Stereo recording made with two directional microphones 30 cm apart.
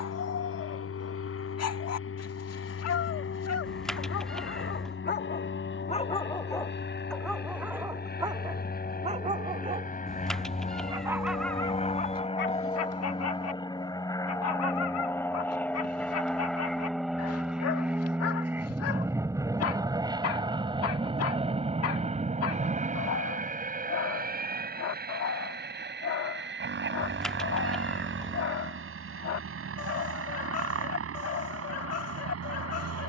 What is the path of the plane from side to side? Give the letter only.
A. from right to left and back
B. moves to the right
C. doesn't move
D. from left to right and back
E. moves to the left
B.